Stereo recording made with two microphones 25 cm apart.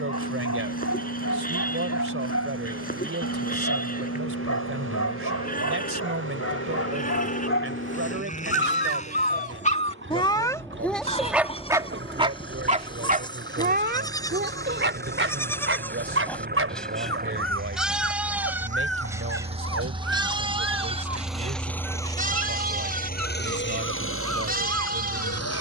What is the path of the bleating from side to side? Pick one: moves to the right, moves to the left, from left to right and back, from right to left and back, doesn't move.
moves to the right.